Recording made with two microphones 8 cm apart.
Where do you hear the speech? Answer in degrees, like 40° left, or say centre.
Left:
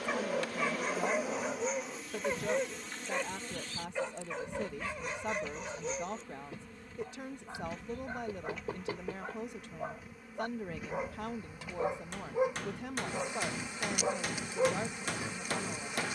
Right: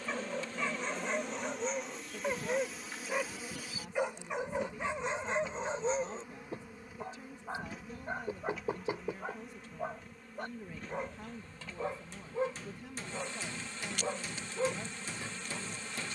70° left.